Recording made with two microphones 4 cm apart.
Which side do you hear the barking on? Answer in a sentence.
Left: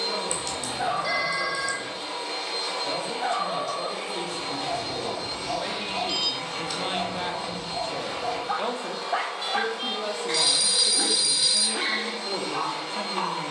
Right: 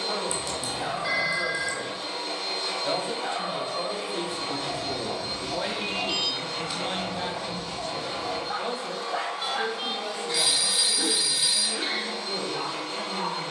You can hear the barking on the left.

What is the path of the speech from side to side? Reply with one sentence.
In this clip you hear the speech move from right to left.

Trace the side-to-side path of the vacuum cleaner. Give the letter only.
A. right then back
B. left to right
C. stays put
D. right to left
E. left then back
C.